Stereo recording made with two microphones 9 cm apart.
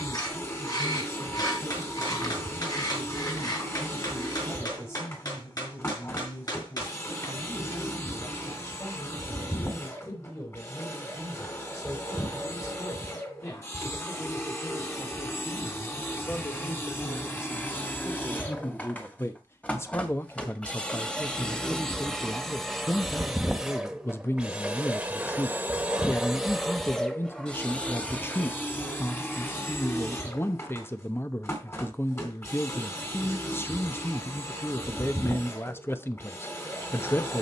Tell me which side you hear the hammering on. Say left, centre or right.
left.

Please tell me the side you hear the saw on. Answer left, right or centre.
left.